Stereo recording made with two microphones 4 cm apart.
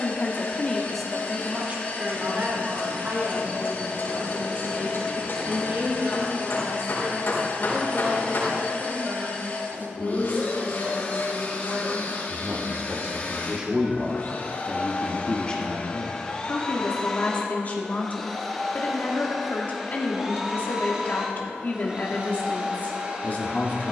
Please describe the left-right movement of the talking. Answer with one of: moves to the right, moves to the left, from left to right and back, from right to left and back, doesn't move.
from left to right and back.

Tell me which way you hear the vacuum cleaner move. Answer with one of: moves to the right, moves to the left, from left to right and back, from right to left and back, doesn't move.
moves to the right.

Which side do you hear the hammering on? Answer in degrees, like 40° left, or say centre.
60° left.